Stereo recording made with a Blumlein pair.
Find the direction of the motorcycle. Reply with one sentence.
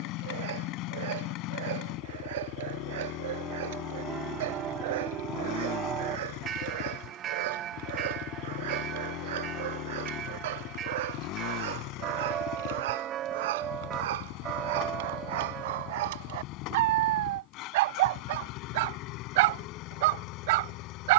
You can hear the motorcycle on the left.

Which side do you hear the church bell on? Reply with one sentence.
In this clip you hear the church bell on the right.